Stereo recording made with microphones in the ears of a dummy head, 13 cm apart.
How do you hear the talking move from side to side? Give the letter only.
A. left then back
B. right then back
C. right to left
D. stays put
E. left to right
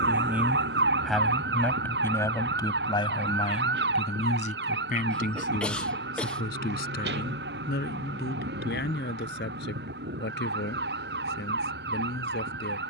C.